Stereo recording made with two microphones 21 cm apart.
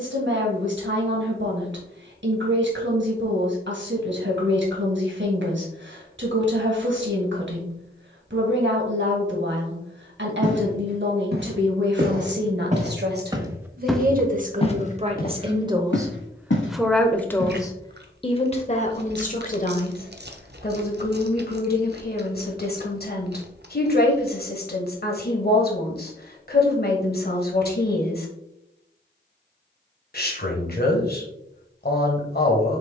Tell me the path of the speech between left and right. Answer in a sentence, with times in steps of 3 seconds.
You can hear the speech on the right from 0 s, in the centre from 15 s and on the left from 18 s.